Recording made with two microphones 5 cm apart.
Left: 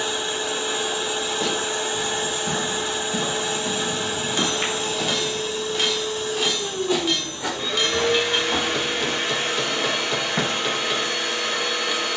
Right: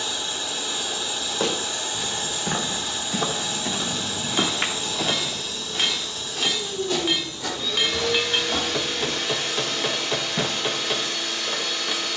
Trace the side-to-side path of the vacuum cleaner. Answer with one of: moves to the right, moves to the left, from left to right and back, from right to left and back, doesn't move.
doesn't move.